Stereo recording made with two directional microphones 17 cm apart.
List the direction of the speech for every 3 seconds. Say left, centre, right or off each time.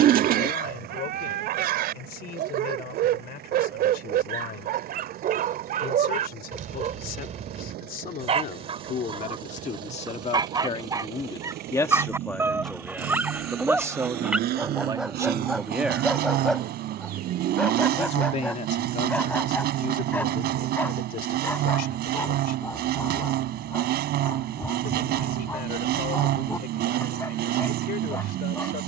left, left, left, left, centre, centre, left, left, left, left.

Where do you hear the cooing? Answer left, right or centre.
right.